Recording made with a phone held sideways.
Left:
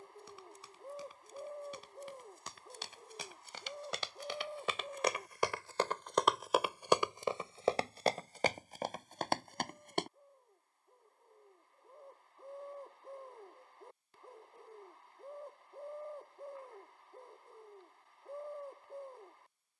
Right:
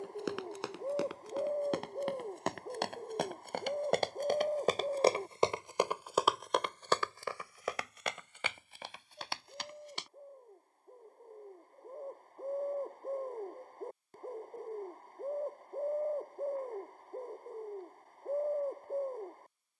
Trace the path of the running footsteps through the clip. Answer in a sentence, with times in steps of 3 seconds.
You can hear the running footsteps on the right from 0 s, on the left from 6 s and not at all from 12 s.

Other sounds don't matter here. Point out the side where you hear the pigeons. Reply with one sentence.
You can hear the pigeons on the right.